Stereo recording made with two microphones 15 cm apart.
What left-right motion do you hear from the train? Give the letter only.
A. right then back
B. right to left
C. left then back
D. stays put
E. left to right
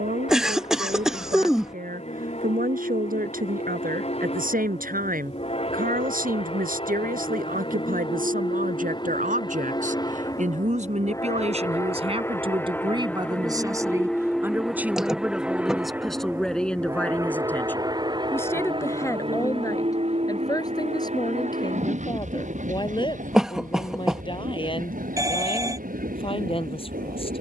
E.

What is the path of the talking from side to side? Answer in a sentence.
In this clip you hear the talking go from the right side to the left.